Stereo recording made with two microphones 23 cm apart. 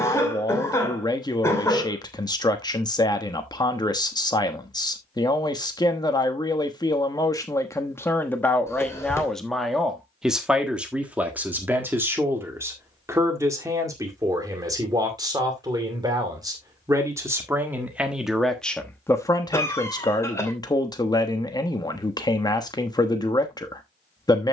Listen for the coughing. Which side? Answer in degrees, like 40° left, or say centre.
10° left.